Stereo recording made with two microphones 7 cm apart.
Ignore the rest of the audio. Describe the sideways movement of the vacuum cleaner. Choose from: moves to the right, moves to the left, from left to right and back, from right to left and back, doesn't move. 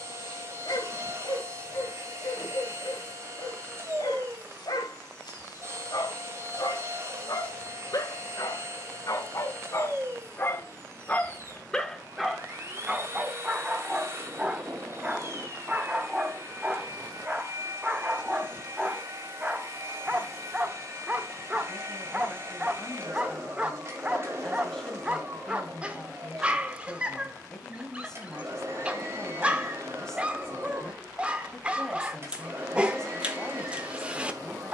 doesn't move.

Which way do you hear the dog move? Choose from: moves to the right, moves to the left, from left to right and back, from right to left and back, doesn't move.
moves to the right.